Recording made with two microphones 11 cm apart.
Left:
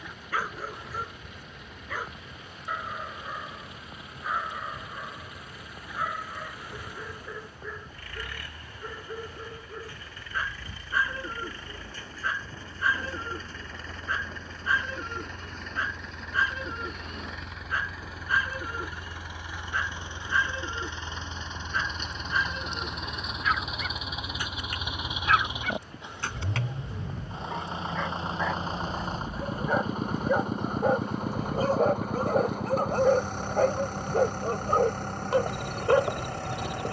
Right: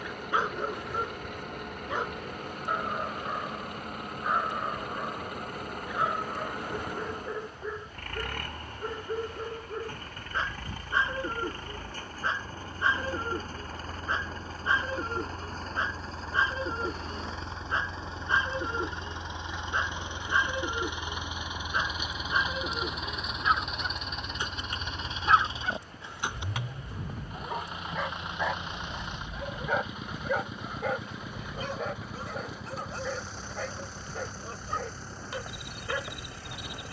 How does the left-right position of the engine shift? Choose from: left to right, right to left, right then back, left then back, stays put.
right to left.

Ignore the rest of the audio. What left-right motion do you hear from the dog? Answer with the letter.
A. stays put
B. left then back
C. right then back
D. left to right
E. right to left
E.